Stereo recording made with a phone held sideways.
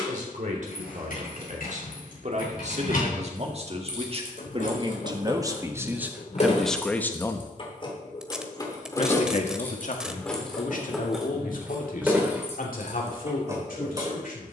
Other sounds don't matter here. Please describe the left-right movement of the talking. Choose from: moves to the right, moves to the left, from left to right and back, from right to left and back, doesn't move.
moves to the left.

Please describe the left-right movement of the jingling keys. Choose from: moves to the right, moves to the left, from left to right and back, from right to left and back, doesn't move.
moves to the right.